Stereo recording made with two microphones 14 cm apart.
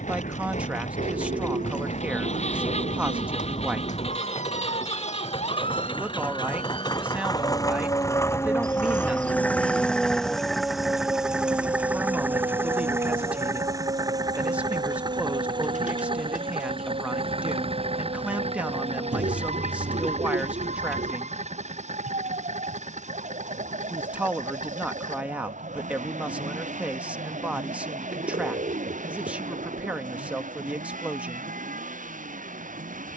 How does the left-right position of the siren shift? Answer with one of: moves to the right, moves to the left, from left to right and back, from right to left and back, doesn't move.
moves to the right.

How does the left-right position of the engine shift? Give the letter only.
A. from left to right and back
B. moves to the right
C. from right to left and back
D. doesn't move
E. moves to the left
B.